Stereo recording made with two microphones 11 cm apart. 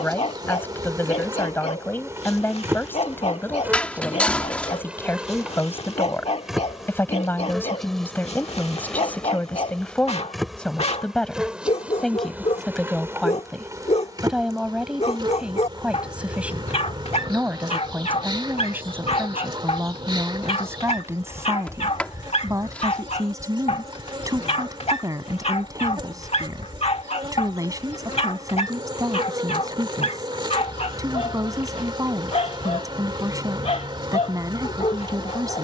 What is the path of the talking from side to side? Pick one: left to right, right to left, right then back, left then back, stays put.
left to right.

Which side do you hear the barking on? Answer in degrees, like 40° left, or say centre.
70° left.